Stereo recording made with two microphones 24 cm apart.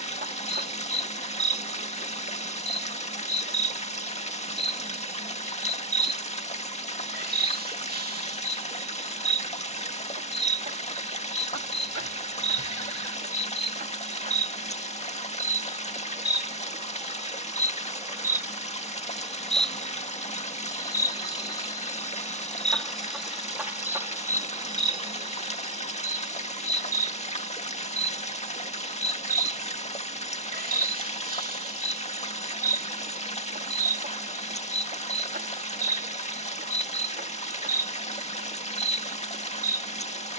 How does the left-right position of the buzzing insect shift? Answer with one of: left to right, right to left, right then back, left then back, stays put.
left then back.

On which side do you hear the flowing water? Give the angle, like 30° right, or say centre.
30° left.